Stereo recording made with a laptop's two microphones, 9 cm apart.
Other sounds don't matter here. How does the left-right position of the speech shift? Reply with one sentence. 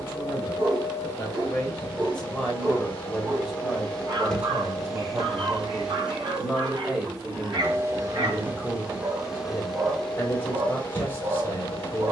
You can hear the speech go right and come back.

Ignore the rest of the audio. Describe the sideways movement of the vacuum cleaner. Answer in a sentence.
You can hear the vacuum cleaner move from left to right and back again.